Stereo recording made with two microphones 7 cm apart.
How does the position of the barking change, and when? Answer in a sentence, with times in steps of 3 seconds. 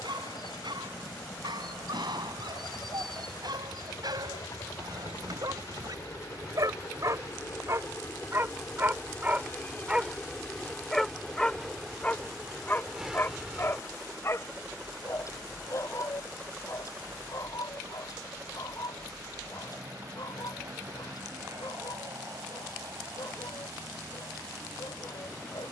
In this clip you hear the barking on the right from 0 s, in the centre from 9 s and on the left from 12 s.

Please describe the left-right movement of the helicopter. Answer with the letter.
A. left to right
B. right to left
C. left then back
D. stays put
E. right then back
A.